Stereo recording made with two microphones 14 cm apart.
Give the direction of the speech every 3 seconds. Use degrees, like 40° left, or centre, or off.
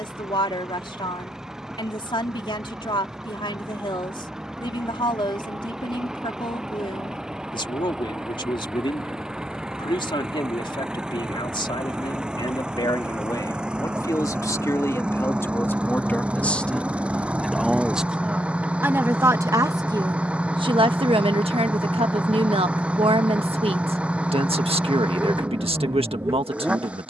40° left, 40° left, 40° left, 40° left, 30° left, 10° left, 20° right, 50° right, 50° right.